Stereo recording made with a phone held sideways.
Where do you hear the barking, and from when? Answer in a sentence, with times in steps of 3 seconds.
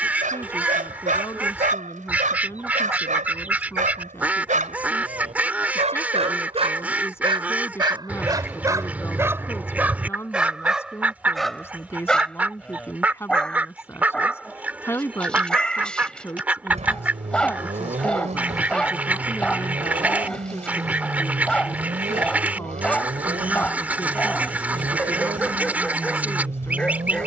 In this clip you hear the barking on the right from 0 s and in the centre from 9 s.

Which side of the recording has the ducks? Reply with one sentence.
You can hear the ducks in the centre.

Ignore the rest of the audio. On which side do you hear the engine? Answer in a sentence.
In this clip you hear the engine on the right.